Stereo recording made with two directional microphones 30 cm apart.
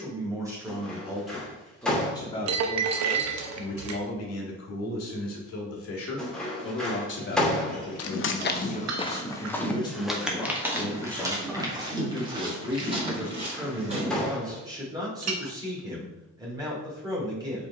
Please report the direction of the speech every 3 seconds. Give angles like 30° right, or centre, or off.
centre, 50° left, 40° left, 10° left, 10° right, 10° right.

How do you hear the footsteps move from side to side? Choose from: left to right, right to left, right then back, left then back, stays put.
left to right.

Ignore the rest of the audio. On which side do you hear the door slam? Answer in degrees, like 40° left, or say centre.
centre.